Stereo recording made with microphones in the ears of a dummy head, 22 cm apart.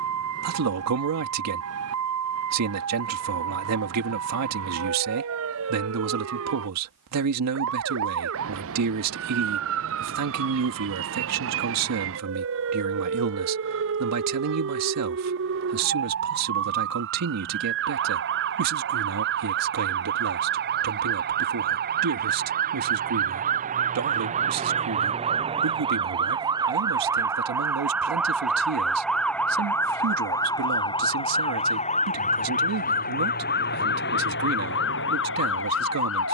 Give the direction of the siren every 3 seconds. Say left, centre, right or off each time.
right, right, right, right, right, right, right, right, right, centre, left, left.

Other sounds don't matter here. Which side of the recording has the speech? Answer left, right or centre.
right.